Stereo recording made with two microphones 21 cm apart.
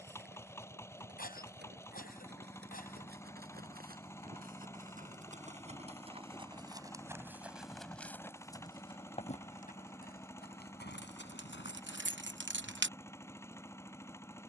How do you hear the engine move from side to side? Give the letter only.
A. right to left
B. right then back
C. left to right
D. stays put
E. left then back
D.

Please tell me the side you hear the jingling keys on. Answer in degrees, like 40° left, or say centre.
70° right.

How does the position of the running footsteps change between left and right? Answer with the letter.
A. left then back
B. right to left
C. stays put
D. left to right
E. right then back
B.